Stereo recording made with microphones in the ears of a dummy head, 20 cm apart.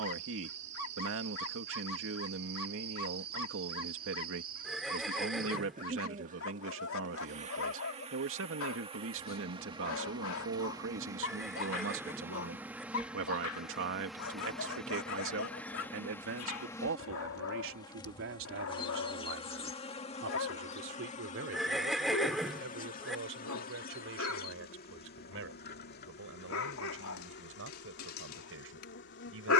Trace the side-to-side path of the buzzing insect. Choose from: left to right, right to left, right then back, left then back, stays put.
right to left.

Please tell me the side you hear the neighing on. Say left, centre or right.
centre.